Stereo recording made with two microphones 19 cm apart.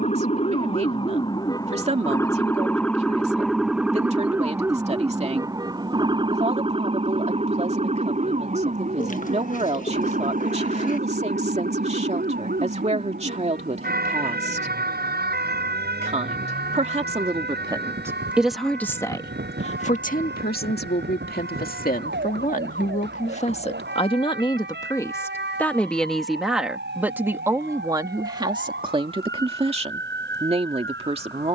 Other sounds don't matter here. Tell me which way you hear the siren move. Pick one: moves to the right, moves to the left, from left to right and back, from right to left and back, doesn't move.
moves to the right.